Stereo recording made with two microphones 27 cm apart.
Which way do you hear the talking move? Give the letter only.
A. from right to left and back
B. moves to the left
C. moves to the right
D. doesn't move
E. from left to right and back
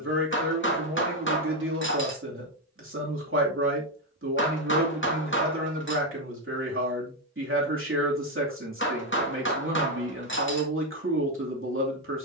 D.